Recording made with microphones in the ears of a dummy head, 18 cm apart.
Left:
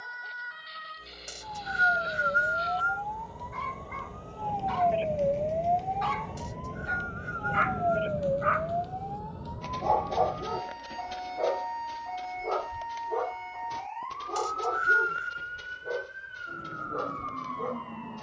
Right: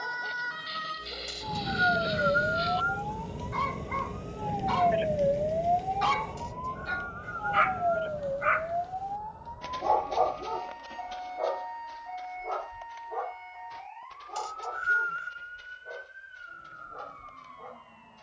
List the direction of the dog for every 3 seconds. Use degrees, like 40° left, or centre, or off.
70° right, 60° right, 40° right, 20° left, 50° left, 70° left.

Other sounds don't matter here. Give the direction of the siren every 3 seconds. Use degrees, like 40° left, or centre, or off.
60° right, 20° right, 20° left, 50° left, 60° left, 70° left.